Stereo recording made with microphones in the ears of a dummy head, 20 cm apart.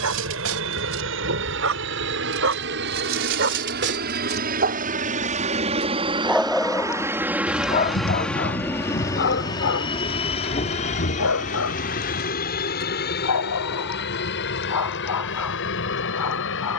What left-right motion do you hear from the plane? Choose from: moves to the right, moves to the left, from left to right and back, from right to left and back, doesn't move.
moves to the left.